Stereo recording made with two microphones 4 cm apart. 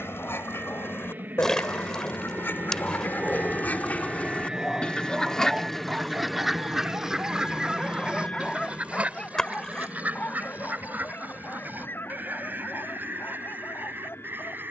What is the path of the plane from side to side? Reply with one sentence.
In this clip you hear the plane go from the right side to the left.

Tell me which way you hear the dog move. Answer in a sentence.
In this clip you hear the dog move from left to right and back again.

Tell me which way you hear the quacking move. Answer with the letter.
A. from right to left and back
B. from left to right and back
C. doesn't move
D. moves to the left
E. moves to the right
E.